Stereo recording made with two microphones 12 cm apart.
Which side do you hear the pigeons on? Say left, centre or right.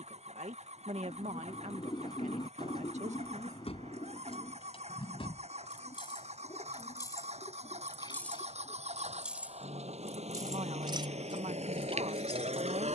left.